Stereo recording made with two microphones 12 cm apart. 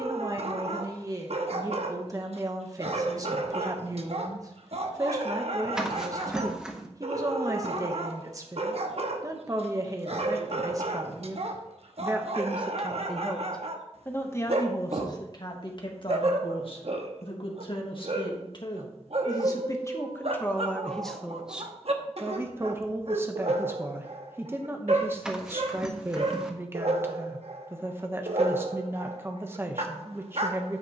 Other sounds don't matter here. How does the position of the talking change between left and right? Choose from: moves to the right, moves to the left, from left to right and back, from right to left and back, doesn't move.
from right to left and back.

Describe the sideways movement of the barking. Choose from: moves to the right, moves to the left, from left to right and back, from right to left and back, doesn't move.
doesn't move.